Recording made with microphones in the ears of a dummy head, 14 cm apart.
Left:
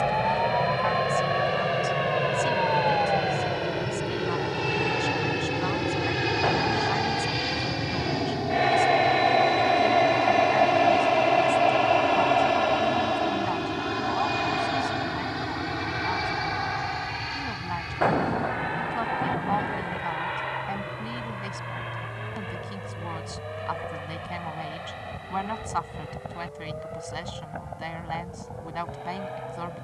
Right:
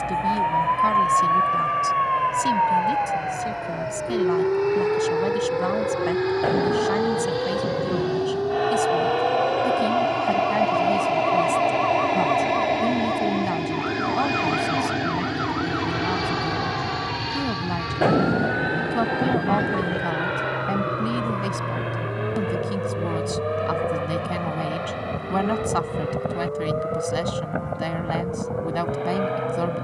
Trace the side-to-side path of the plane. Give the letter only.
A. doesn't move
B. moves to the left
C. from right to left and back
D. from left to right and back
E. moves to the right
E.